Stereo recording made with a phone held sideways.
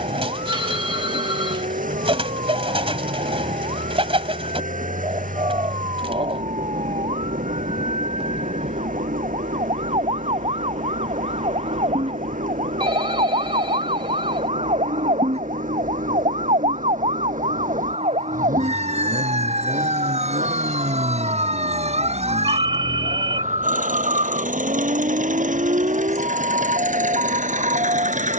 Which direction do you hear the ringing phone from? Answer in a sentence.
In this clip you hear the ringing phone on the right.